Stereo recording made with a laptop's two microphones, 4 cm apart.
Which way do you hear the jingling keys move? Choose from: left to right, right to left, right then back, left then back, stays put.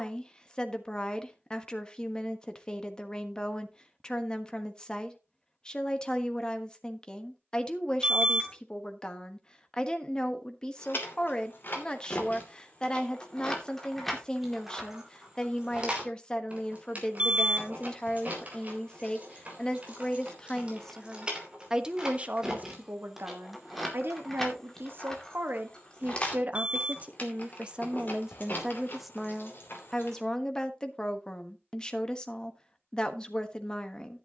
right then back.